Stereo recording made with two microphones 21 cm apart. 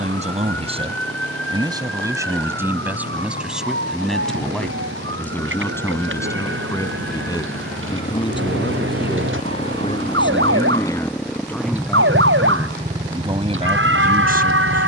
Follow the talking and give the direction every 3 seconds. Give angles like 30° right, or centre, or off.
20° right, centre, 20° left, 20° left, 20° right.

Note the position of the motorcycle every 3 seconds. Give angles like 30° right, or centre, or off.
60° left, 60° left, 40° left, 10° left, 30° right.